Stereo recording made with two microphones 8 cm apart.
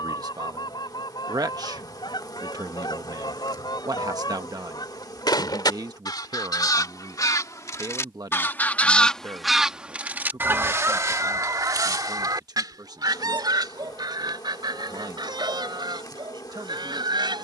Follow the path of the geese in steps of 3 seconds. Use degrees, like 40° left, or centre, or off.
80° left, 70° left, 40° left, 30° right, 70° right, 80° right.